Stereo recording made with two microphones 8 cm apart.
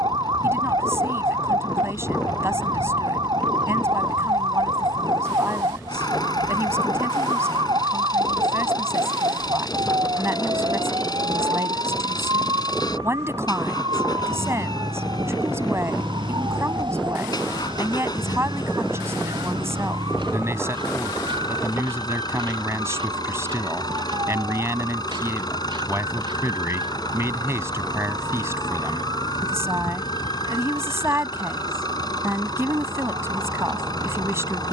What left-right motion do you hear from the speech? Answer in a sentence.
You can hear the speech stay put.